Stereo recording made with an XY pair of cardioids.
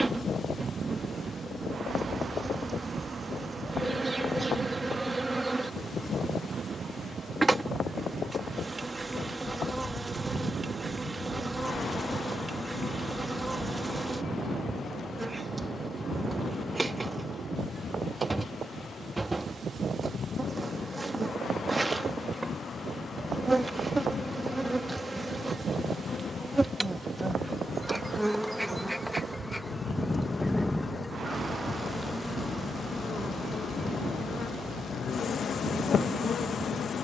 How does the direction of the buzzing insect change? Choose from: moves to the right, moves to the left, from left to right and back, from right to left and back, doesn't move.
moves to the left.